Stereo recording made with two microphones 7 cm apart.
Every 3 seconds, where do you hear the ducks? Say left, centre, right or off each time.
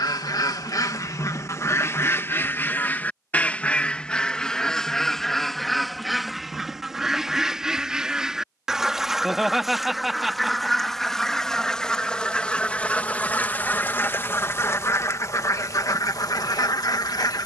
left, centre, centre, centre, left, left.